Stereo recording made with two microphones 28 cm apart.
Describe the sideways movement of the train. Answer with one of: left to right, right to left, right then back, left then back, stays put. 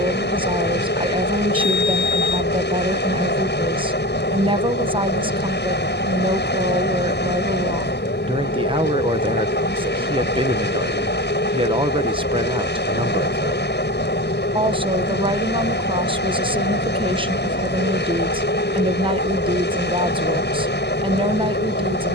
stays put.